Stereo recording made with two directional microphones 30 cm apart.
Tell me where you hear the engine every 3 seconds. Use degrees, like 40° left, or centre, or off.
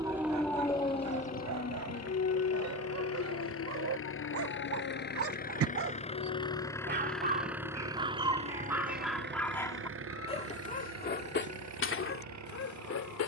60° left, 40° left, centre, 50° right, 60° right.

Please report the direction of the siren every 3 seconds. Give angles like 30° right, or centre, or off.
20° left, 50° left, 60° left, 60° left, 70° left.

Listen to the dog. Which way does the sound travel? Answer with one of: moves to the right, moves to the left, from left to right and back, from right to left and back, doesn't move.
moves to the left.